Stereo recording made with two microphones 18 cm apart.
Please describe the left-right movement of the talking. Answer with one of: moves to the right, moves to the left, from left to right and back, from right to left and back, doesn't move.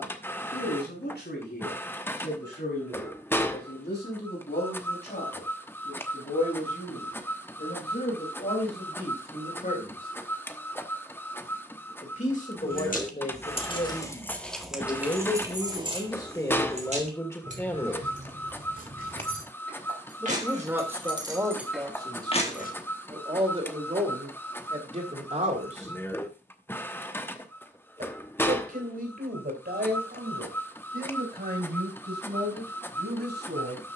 moves to the right.